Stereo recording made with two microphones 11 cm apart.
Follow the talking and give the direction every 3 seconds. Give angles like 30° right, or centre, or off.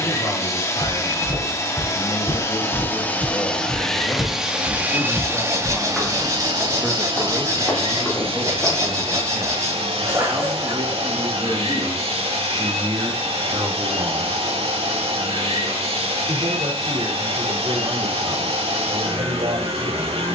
50° left, 30° left, centre, 30° right, 50° right, 60° right, 70° right.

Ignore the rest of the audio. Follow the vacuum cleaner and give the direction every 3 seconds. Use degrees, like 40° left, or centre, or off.
30° left, 10° right, 50° right, 70° right, 70° right, 70° right, 70° right.